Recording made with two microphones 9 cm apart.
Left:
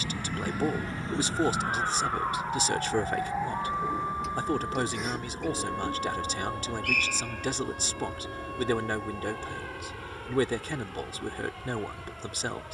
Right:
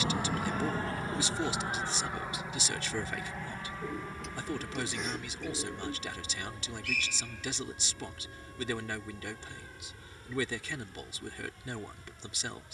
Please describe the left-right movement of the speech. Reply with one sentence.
You can hear the speech stay put.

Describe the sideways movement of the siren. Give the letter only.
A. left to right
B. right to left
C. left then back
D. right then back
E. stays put
B.